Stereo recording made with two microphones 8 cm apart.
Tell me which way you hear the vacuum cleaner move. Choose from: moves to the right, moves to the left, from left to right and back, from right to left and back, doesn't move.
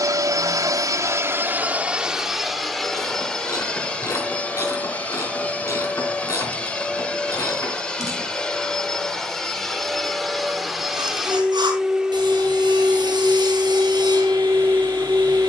from right to left and back.